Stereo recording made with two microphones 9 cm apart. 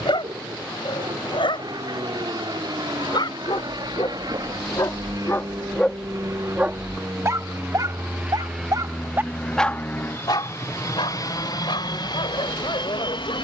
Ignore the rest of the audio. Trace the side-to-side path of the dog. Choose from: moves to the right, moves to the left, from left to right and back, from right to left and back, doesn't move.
from left to right and back.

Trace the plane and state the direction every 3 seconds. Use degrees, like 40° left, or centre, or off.
70° right, 60° right, 30° right, 30° left, 60° left.